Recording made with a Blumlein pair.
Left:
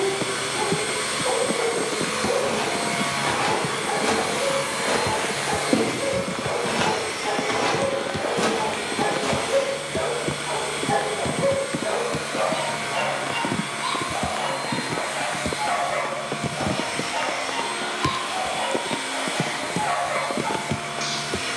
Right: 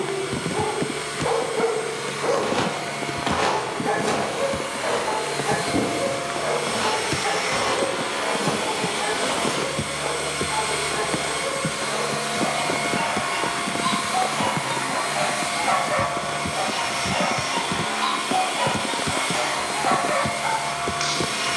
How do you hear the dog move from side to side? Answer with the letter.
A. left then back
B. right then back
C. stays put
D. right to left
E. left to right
A.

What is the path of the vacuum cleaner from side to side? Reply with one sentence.
You can hear the vacuum cleaner travel towards the right.